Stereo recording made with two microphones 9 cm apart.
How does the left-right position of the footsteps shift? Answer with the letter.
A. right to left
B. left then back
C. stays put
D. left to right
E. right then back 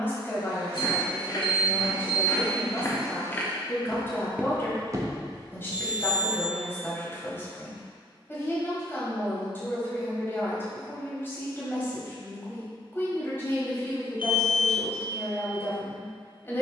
D.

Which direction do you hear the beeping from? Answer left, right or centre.
left.